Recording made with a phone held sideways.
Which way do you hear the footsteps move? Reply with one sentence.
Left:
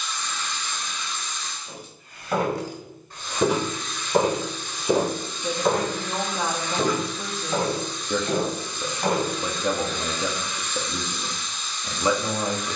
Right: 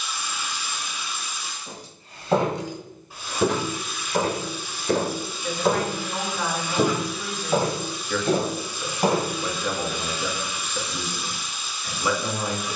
In this clip you hear the footsteps move from right to left and back again.